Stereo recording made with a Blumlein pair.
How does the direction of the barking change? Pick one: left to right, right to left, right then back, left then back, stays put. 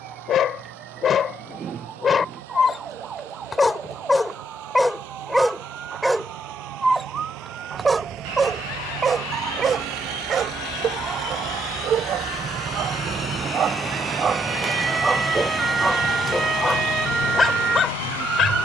right then back.